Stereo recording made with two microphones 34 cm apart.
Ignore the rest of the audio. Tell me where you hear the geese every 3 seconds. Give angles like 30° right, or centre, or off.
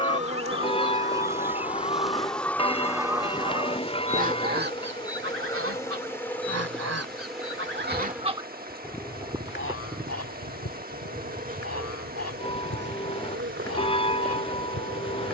20° left, 30° right, 30° right, 40° left, 50° left.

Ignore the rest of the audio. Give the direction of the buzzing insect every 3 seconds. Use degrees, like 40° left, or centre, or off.
10° right, 10° left, centre, 20° right, 30° right.